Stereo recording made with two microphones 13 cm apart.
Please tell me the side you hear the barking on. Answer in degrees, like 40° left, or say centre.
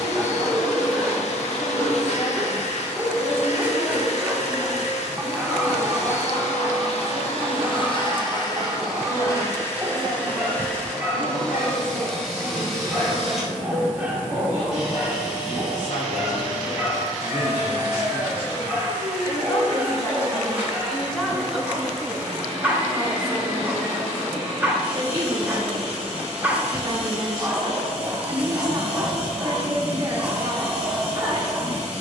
10° right.